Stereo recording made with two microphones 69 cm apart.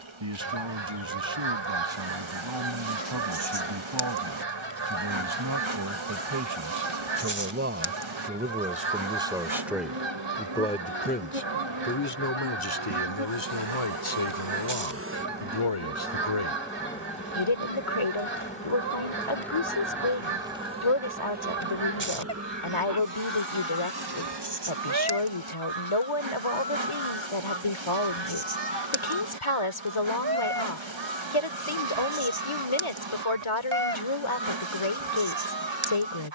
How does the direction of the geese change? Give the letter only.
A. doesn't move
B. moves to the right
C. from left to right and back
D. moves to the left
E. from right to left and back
A.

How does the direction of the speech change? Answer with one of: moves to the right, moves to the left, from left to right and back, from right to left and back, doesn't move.
moves to the left.